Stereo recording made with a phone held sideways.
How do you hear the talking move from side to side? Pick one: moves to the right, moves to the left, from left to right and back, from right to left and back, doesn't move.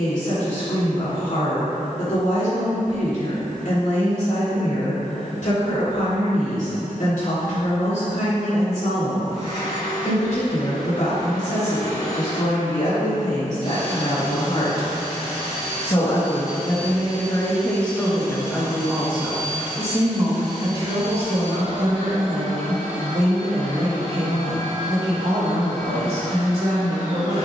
moves to the right.